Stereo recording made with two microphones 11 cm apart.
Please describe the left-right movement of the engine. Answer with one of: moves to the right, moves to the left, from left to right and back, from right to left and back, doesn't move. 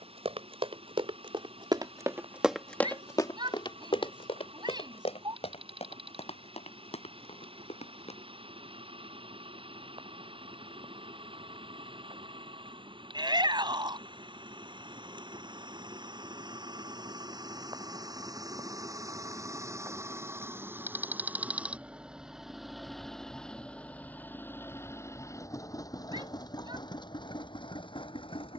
moves to the left.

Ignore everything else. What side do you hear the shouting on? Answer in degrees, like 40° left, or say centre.
40° right.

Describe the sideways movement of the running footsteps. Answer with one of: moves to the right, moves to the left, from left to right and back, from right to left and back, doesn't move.
moves to the left.